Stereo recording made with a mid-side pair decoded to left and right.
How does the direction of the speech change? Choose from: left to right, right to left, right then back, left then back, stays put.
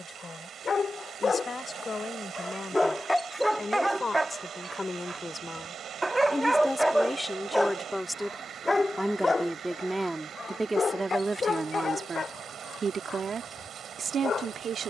left to right.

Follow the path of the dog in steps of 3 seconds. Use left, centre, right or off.
left, centre, centre, left, left.